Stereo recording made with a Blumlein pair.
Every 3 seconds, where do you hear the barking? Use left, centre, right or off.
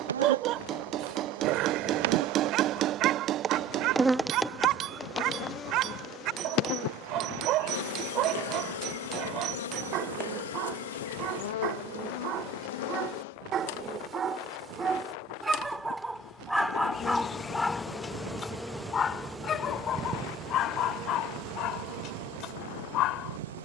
right, right, right, right, right, centre, left, left.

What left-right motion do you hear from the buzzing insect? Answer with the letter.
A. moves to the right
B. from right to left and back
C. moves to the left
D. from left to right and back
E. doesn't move
B.